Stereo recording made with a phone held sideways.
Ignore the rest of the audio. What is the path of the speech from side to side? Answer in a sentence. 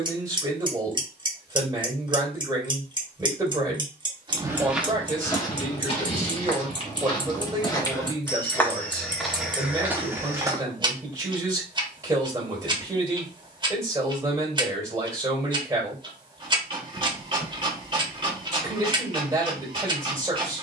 You can hear the speech stay in one place.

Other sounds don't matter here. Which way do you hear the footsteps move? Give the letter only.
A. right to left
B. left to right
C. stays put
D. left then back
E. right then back
D.